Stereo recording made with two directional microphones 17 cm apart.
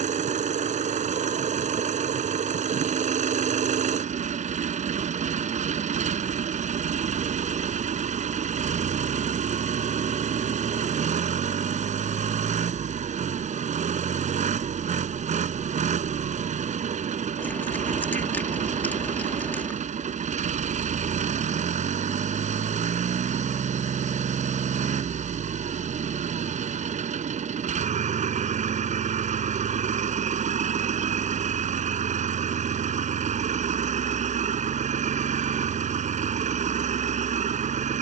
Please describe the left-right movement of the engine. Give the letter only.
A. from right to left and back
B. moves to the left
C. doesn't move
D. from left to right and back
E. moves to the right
C.